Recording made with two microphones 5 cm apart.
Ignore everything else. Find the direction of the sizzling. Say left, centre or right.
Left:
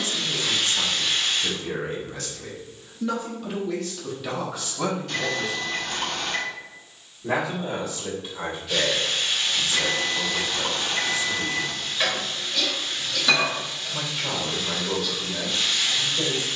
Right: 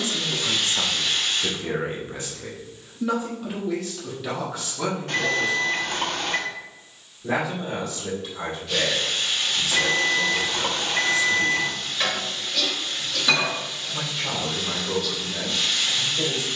centre.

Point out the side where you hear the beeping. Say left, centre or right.
right.